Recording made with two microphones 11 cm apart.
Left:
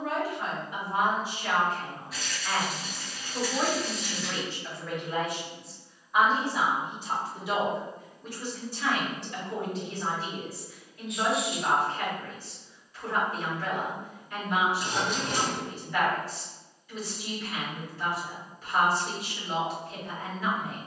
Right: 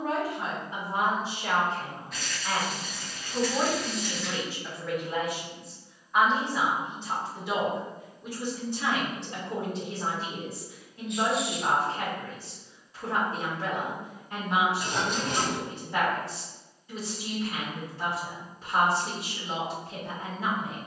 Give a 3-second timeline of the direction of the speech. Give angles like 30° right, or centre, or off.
30° right, 10° right, centre, 30° right, 30° right, 30° right, 30° right.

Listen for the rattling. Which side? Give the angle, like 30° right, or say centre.
centre.